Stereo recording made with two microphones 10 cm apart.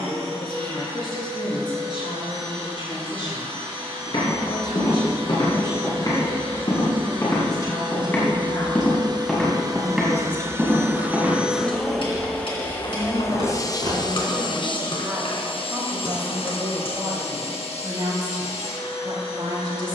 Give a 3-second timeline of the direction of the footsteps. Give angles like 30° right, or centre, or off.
off, 50° left, 30° left, 10° right, 50° right, off, off.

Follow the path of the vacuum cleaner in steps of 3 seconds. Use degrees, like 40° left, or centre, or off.
70° right, 60° right, 50° right, 20° right, 30° left, 60° left, 80° left.